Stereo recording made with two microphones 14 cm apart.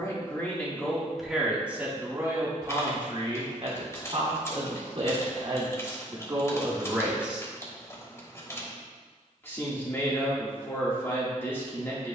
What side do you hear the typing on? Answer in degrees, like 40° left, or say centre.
20° left.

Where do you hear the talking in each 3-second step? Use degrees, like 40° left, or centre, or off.
10° right, 40° right, 20° right, 20° left.